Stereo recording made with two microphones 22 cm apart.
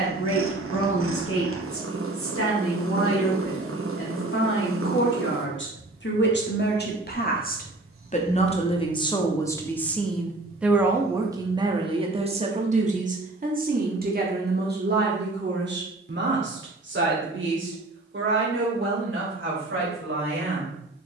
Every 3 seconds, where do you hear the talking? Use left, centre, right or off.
left, left, left, centre, right, right, right.